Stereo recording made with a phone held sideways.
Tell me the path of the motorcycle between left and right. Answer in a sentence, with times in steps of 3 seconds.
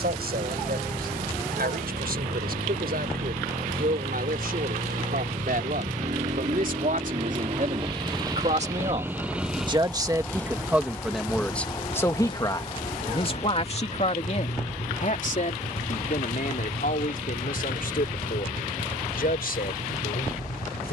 In this clip you hear the motorcycle on the right from 0 s, in the centre from 9 s and on the left from 12 s.